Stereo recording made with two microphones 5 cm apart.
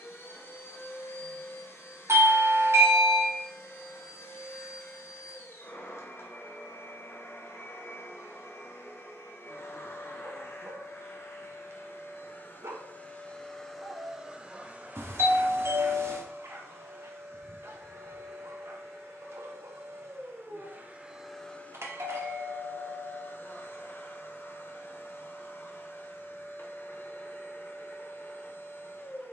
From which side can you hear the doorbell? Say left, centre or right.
right.